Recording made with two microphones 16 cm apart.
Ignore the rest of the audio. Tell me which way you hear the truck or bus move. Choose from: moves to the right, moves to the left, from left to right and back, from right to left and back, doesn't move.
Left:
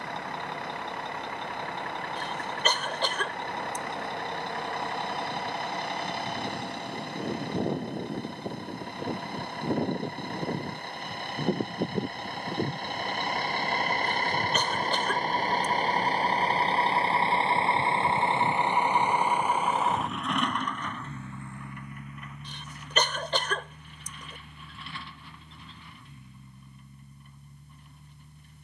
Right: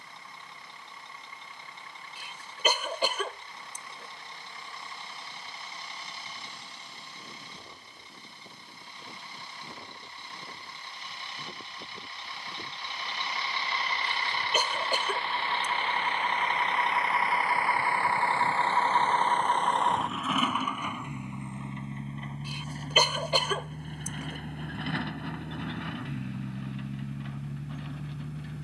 moves to the right.